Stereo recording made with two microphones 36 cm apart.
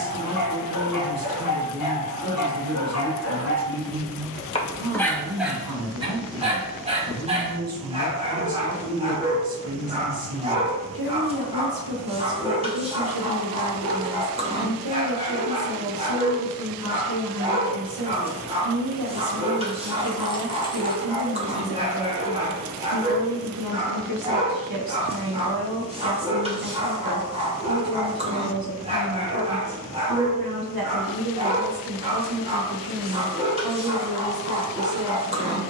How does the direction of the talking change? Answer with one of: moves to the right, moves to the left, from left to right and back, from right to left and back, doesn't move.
doesn't move.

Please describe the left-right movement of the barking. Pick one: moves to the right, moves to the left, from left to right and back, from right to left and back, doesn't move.
moves to the right.